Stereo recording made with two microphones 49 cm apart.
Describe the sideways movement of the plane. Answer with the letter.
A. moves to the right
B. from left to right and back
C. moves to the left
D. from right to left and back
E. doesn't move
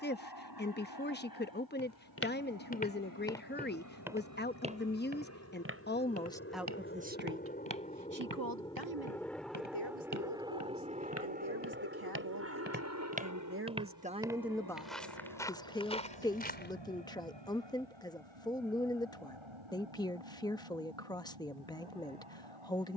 A.